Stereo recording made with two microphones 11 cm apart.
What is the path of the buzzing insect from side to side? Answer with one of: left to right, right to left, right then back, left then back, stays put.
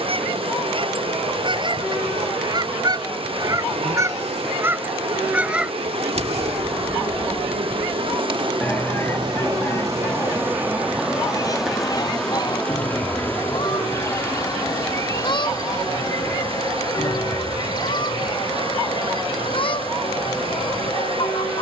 right to left.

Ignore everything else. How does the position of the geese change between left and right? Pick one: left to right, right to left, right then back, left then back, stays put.
right to left.